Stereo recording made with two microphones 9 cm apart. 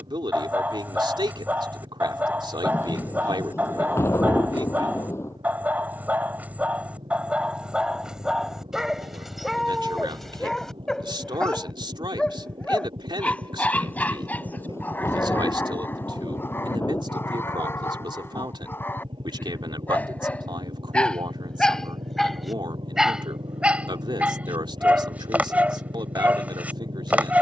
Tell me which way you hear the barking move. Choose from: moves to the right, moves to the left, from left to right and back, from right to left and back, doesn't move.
from right to left and back.